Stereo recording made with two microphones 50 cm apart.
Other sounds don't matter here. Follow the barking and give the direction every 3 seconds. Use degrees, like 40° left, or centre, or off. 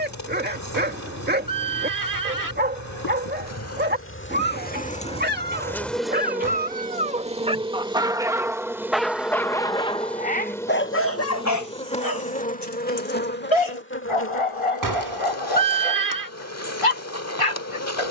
20° right, 20° right, 10° right, 20° left, 70° left, 80° left.